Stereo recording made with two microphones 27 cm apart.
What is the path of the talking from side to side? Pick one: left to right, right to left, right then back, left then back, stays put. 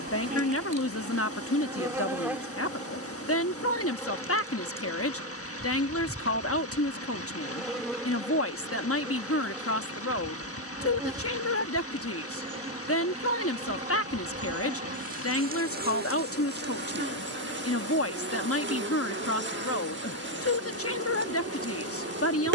stays put.